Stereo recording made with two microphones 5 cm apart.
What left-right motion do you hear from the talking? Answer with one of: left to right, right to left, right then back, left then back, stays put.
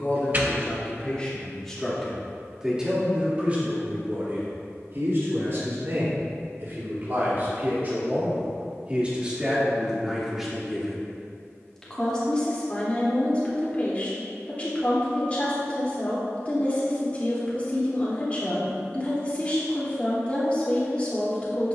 right then back.